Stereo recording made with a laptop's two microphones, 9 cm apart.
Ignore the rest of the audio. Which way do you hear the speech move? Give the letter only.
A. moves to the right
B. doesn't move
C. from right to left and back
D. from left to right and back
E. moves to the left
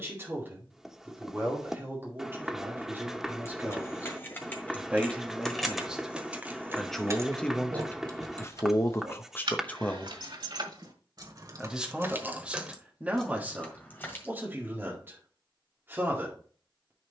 C.